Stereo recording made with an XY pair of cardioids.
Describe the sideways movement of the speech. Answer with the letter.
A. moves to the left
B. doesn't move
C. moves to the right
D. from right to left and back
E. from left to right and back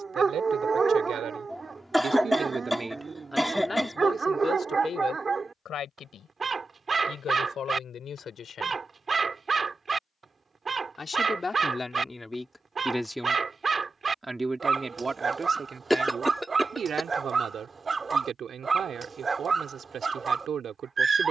D.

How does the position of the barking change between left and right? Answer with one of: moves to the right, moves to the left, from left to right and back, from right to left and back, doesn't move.
doesn't move.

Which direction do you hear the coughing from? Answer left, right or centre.
centre.